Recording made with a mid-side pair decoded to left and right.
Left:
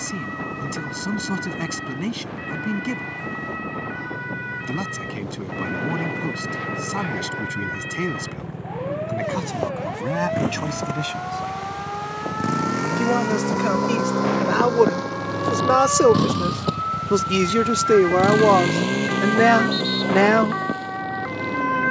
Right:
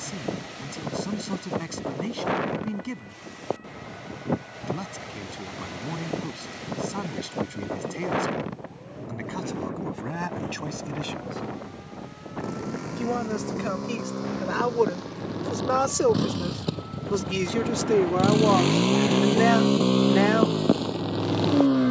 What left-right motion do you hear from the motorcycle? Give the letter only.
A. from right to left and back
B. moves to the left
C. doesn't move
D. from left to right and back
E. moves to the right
E.